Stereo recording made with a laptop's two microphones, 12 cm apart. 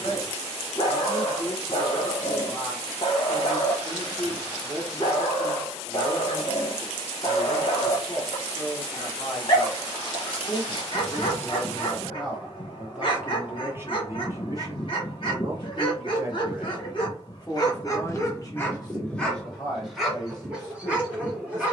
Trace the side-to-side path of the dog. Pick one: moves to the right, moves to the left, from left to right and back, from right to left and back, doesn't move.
moves to the right.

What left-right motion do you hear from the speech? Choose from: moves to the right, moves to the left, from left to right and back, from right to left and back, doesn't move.
from left to right and back.